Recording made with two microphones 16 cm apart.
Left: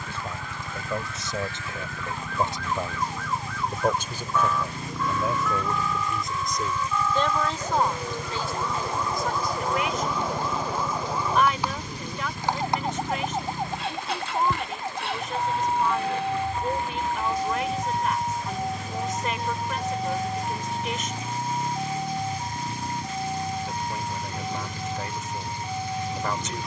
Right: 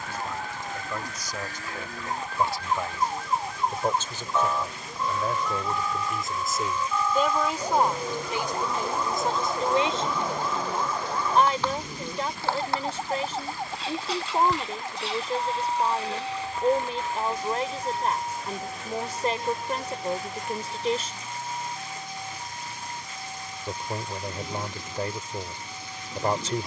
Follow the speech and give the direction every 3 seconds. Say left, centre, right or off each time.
left, centre, centre, right, right, right, right, right, right.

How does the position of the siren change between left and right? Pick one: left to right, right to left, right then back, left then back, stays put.
right to left.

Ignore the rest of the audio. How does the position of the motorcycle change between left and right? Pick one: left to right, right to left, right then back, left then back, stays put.
stays put.